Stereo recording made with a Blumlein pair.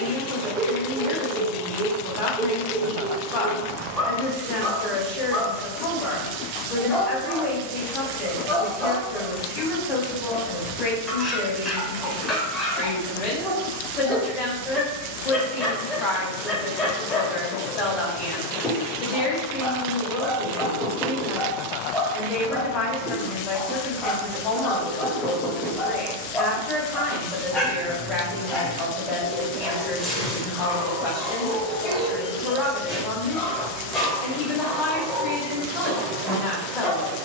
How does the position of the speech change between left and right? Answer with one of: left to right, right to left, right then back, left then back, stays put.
stays put.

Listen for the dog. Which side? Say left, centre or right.
centre.